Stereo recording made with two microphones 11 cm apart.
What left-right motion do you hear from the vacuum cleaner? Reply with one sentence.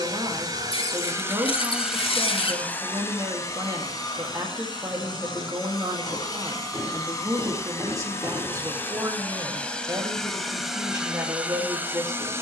You can hear the vacuum cleaner go left and come back.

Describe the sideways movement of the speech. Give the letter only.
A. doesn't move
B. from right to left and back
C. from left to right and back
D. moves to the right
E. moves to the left
A.